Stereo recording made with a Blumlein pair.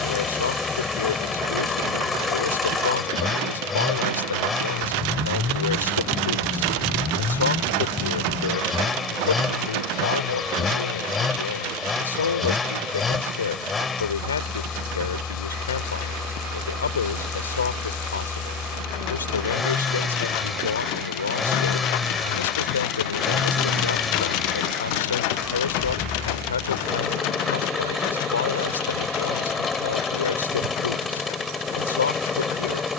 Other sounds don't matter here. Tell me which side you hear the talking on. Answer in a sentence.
In this clip you hear the talking on the left.